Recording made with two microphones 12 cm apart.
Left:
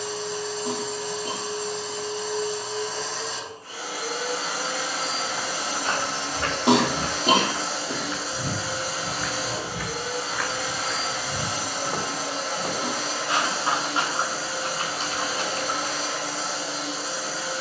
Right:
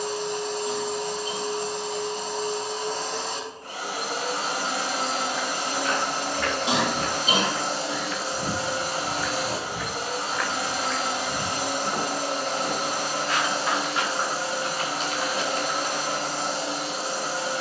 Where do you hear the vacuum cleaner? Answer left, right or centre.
right.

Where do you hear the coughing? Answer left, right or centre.
left.